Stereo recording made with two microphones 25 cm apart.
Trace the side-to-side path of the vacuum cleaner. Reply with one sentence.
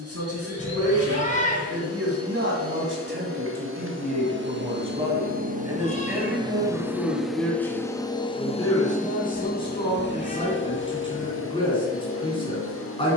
You can hear the vacuum cleaner move from right to left.